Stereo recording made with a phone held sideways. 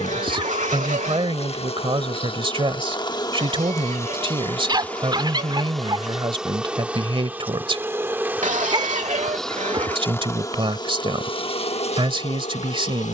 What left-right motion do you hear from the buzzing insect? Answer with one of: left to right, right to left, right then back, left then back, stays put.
right then back.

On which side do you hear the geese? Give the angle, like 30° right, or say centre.
80° right.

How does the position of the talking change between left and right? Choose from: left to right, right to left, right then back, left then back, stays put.
stays put.